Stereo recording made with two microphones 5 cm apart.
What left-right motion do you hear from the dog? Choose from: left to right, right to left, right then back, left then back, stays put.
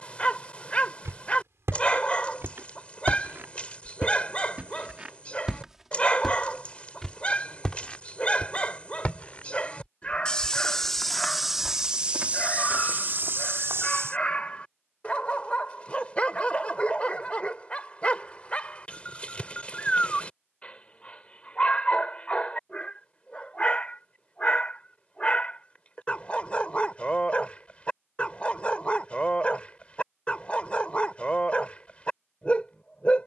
stays put.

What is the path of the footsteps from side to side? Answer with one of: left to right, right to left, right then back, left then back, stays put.
left then back.